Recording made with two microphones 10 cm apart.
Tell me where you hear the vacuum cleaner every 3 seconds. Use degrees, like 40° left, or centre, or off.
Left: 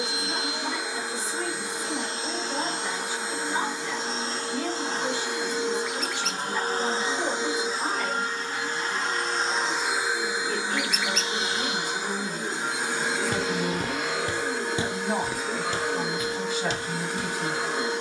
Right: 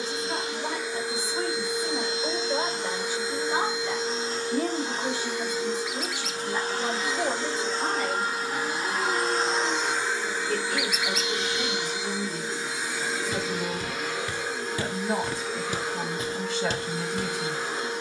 70° left, 70° left, 20° left, 20° left, 60° left, 70° left.